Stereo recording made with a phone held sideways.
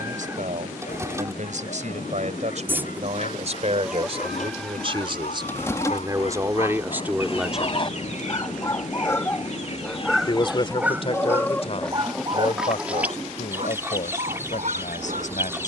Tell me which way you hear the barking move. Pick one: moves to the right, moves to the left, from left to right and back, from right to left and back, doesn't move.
moves to the right.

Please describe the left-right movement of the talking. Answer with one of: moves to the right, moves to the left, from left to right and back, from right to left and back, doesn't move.
moves to the left.